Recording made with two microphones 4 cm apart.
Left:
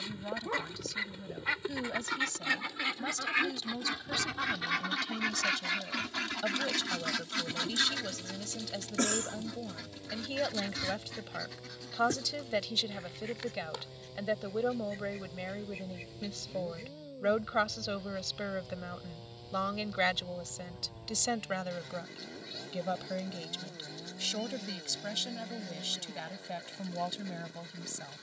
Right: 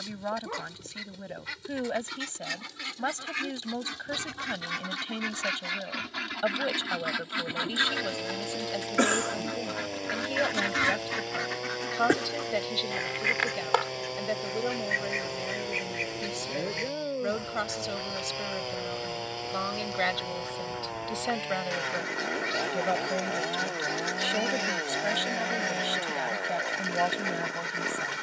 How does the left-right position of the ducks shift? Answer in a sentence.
You can hear the ducks go from the left side to the right.